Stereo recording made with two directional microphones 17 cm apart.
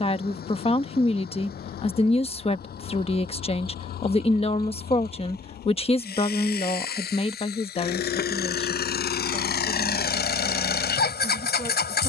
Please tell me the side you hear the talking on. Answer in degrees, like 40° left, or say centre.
40° left.